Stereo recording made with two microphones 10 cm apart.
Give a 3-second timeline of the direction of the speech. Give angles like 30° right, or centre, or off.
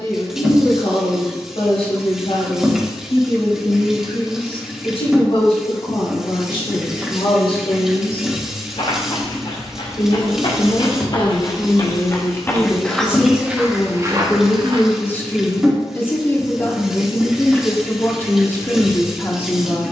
70° left, 70° left, 60° left, 40° left, 20° left, 20° left, 20° left.